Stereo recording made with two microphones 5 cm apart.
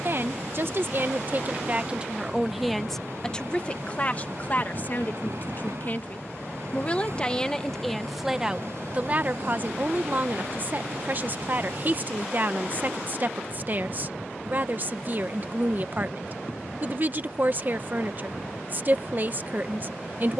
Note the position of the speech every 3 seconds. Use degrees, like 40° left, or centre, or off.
30° right, 30° left, 10° left, 40° right, 40° right, 40° right, 40° right.